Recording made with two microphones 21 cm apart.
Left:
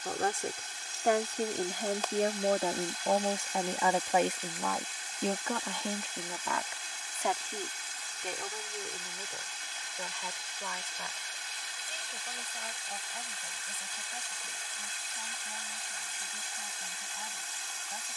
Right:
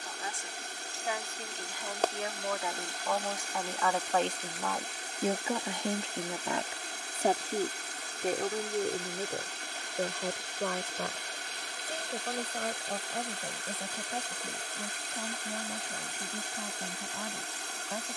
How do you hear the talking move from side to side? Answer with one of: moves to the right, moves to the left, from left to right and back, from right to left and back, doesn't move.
moves to the right.